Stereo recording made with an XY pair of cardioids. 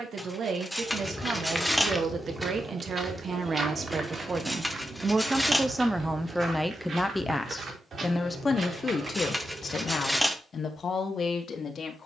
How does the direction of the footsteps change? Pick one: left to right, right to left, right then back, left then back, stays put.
left to right.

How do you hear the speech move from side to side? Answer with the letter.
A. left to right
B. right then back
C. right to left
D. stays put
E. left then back
C.